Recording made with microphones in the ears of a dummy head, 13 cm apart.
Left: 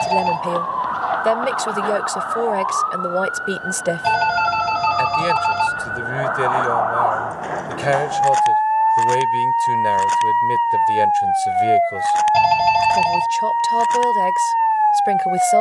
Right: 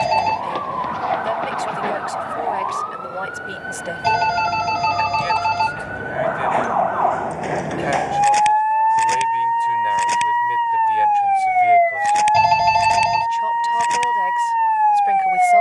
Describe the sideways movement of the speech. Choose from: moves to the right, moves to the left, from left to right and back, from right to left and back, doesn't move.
doesn't move.